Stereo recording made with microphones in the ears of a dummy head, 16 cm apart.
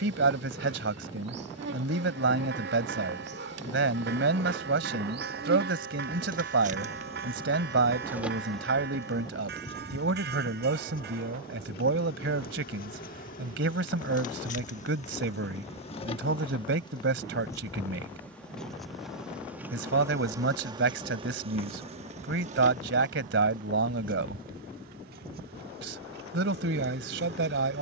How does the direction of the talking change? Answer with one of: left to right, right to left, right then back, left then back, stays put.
stays put.